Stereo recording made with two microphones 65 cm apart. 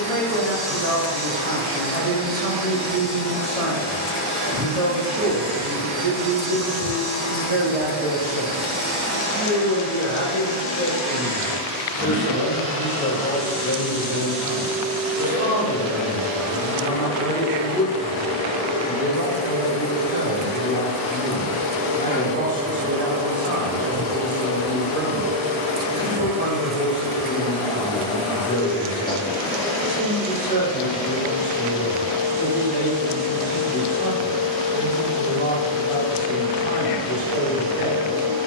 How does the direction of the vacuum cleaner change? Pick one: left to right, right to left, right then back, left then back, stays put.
right then back.